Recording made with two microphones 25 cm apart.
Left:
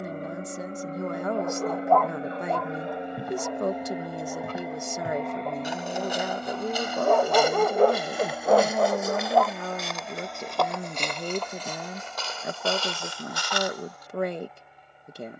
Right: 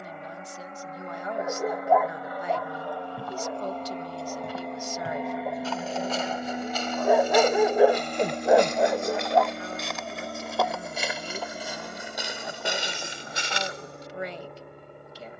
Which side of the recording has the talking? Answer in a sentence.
In this clip you hear the talking on the left.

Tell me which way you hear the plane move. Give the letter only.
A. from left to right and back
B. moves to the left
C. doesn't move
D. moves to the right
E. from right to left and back
D.